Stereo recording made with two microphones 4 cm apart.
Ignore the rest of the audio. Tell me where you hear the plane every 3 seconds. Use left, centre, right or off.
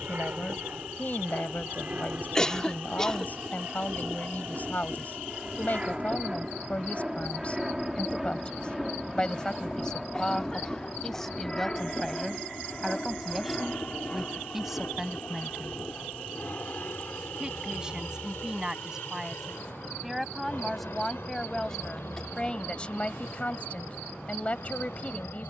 right, right, centre, centre, left, left, left, left, left.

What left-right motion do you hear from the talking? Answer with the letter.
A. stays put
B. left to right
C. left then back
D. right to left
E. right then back
E.